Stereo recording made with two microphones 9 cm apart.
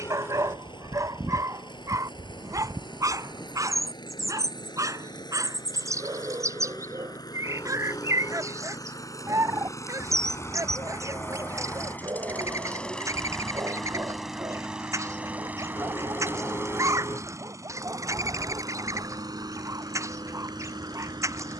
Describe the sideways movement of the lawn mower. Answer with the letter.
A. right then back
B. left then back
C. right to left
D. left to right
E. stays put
D.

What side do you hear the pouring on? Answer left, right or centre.
left.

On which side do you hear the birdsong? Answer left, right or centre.
right.